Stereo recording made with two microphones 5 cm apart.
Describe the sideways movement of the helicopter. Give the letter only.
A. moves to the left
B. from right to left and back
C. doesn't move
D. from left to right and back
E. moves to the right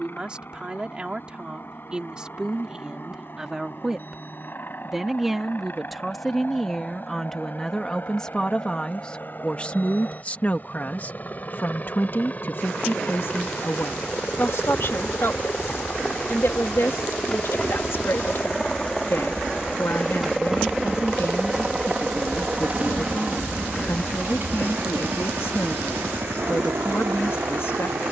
E.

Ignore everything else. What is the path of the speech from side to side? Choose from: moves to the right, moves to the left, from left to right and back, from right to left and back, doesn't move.
moves to the left.